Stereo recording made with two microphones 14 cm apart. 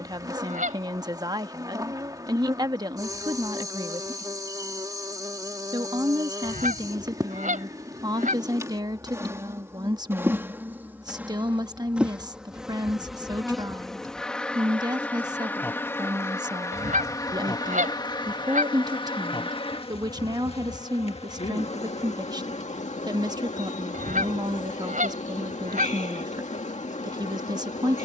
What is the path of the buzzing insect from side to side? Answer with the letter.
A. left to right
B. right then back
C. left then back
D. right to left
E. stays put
D.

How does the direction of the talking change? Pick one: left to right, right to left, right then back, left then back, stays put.
stays put.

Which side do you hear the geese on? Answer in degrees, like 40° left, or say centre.
70° right.